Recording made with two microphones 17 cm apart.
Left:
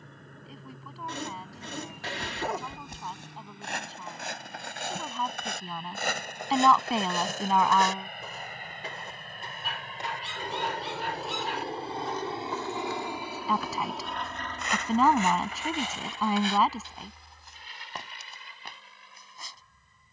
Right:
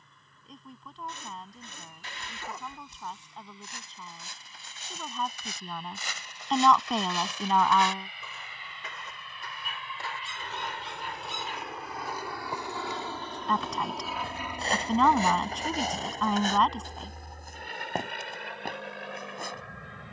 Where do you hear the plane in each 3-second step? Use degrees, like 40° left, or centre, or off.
70° left, 70° left, 60° left, 40° left, 10° left, 40° right, 60° right.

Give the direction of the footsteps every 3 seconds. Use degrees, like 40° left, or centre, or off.
80° left, 70° left, 50° left, 10° left, 20° right, 40° right, 50° right.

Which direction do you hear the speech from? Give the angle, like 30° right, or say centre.
centre.